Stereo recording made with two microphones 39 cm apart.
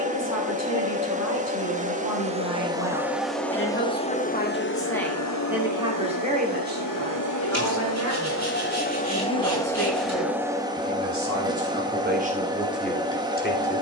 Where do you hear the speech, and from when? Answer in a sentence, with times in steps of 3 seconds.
You can hear the speech on the left from 0 s, in the centre from 3 s, on the right from 6 s and in the centre from 12 s.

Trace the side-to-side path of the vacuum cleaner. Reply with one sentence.
You can hear the vacuum cleaner go left and come back.